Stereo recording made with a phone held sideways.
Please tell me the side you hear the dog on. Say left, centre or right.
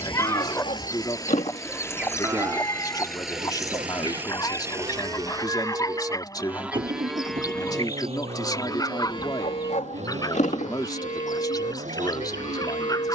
left.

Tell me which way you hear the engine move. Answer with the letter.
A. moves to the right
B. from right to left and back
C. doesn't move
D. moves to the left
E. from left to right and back
A.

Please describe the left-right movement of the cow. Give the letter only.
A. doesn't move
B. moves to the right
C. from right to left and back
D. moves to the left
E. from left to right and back
E.